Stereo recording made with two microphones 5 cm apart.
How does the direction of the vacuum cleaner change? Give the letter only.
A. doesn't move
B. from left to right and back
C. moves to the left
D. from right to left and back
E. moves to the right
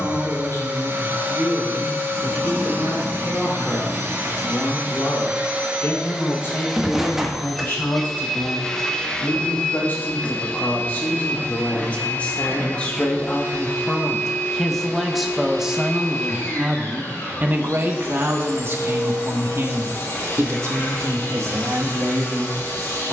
C.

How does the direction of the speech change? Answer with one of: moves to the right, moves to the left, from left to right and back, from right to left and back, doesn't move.
moves to the right.